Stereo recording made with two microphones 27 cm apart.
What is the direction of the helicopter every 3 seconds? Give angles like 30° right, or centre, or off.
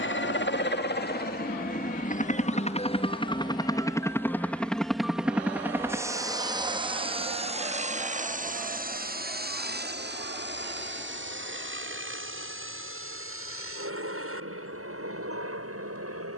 30° left, 10° left, 20° right, 40° right, 50° right, 50° right.